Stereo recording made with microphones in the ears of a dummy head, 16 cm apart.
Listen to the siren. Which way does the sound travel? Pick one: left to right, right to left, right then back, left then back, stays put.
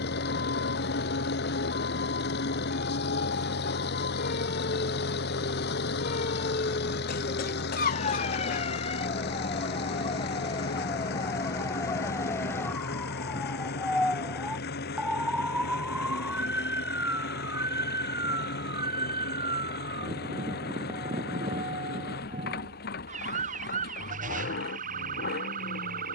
left to right.